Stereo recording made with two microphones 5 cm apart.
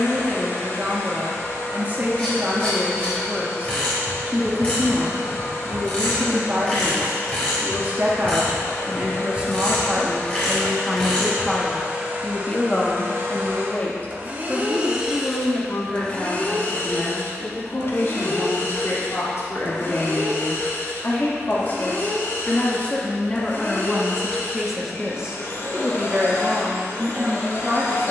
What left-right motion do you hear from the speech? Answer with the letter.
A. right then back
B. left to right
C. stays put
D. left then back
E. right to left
D.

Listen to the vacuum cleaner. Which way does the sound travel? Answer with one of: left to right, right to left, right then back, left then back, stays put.
right then back.